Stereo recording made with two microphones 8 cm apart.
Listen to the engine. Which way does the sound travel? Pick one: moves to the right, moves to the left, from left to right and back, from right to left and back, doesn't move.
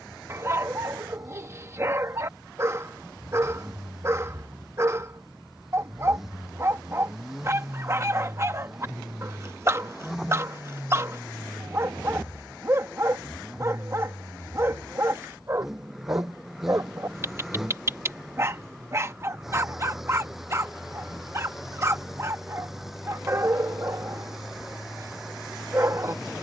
doesn't move.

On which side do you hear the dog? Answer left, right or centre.
right.